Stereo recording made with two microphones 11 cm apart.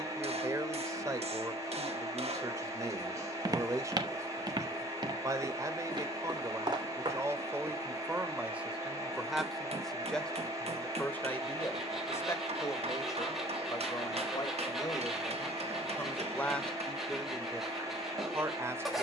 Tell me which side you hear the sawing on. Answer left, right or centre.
centre.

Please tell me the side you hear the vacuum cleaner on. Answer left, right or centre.
right.